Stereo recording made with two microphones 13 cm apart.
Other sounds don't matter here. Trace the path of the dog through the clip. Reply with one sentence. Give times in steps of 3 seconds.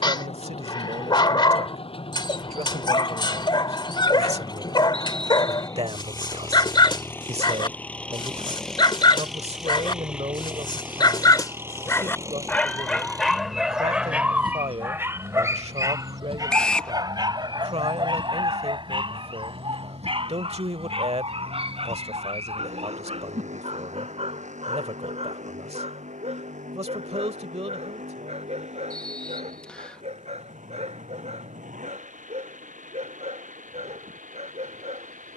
You can hear the dog on the left from 0 s, in the centre from 12 s and on the right from 15 s.